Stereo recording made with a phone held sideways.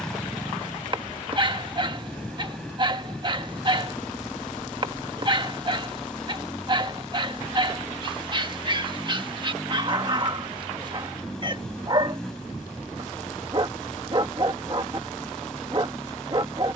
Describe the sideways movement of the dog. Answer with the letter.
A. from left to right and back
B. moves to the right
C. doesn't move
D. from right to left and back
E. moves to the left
C.